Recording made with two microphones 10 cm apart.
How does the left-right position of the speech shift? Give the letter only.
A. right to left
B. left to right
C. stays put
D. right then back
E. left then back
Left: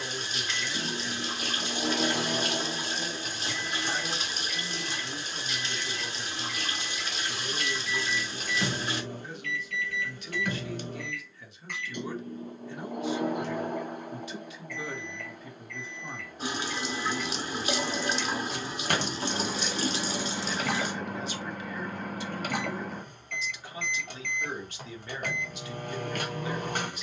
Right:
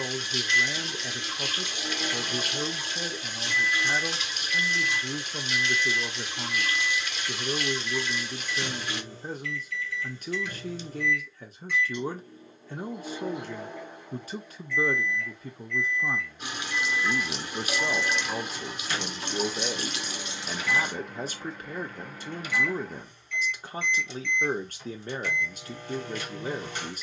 C.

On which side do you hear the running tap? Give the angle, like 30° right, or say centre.
30° left.